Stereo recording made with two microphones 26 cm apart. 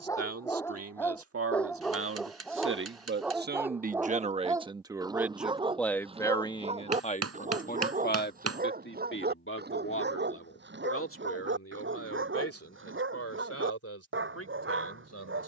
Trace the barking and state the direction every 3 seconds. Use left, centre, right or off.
centre, centre, right, right, right.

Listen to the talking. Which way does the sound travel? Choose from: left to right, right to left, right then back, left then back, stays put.
right to left.